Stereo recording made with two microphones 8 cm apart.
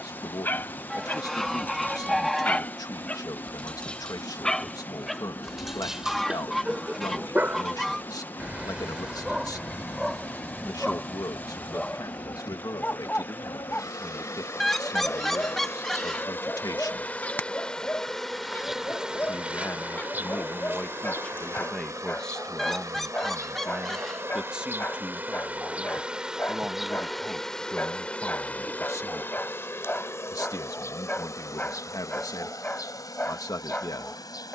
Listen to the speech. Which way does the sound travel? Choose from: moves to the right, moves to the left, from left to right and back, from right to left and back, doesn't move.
from left to right and back.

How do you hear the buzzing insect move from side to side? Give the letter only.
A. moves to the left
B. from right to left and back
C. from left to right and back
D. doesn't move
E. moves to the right
C.